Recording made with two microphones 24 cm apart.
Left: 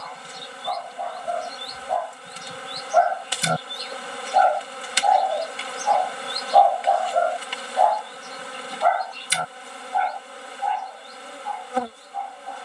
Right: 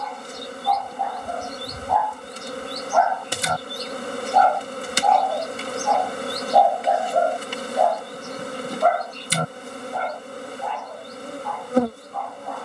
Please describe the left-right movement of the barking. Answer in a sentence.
You can hear the barking travel towards the right.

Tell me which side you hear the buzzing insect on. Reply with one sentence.
In this clip you hear the buzzing insect on the right.